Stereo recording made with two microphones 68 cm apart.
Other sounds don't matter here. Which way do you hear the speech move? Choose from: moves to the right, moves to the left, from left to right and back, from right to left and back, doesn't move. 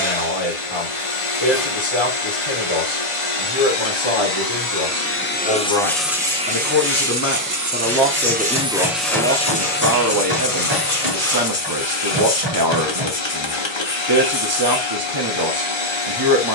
moves to the right.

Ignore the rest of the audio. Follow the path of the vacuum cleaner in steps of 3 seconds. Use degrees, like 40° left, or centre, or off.
50° left, 30° left, 20° right, 30° left, 40° left, 40° left.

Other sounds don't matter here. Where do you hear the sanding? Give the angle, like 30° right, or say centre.
centre.